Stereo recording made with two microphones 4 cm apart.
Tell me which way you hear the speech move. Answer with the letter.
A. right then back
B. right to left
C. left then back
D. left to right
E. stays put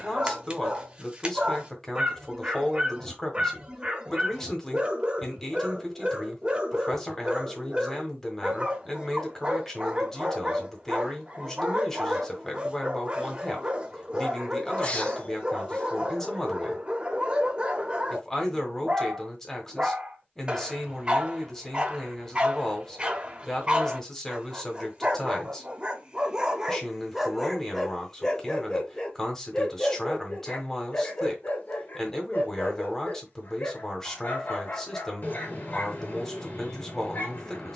E.